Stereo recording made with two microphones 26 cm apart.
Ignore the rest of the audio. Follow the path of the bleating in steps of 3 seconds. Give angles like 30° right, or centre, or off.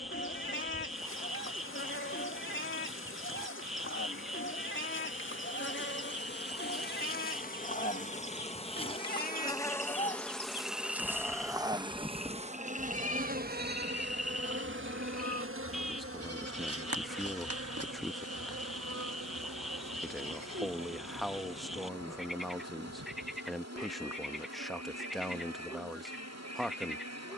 50° left, 50° left, 40° left, 20° left, 30° right, 60° right, 80° right, 80° right, 80° right.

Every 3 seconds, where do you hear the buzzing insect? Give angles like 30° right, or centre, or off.
50° left, 50° left, 30° left, centre, 40° right, 60° right, 70° right, 70° right, 70° right.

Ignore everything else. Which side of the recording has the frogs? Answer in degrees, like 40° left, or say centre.
centre.